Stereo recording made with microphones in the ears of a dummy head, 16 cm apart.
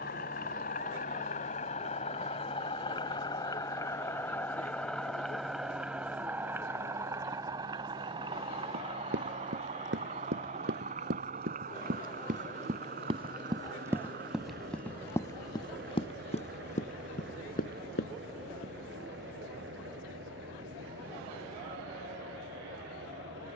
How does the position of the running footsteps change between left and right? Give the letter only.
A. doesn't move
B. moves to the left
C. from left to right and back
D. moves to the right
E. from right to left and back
B.